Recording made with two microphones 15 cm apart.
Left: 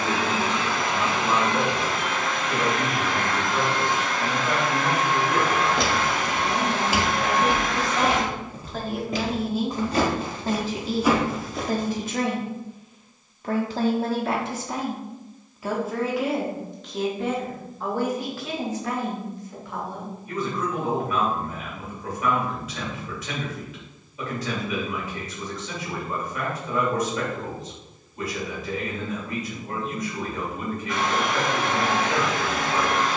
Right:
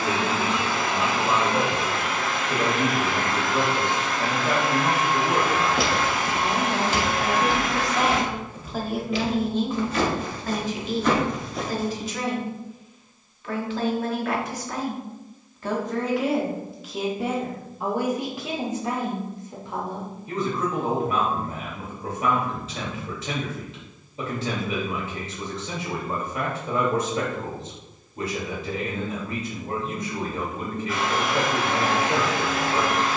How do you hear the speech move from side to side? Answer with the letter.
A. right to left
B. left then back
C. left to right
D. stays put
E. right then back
B.